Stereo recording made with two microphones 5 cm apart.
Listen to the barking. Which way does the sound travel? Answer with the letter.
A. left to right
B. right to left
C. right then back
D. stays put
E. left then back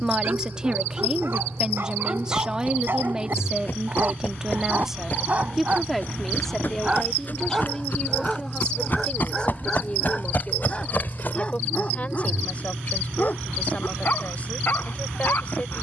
B.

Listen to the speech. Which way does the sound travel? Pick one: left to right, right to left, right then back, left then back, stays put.
right to left.